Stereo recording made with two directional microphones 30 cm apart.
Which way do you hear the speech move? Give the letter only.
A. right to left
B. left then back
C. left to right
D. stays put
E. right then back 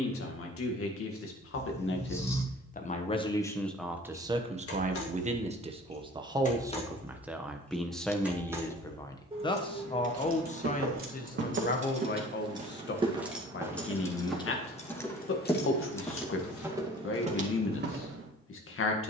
E.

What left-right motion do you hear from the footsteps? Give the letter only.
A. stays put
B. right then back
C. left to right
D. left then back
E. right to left
D.